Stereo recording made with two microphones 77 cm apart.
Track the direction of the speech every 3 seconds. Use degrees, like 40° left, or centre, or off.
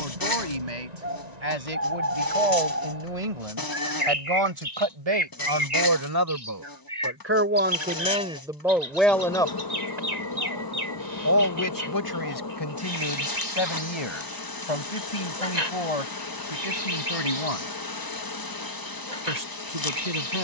60° right, 40° right, 10° right, 20° left, 40° left, 50° left, 60° left.